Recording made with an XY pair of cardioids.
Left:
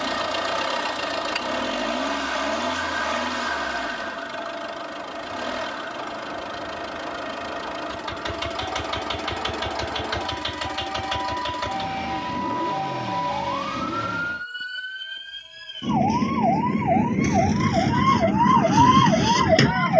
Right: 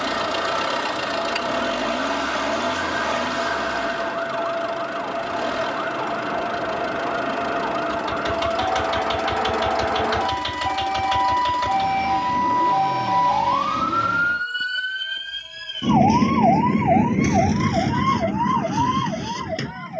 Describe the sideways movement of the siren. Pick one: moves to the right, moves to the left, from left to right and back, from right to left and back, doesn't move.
moves to the left.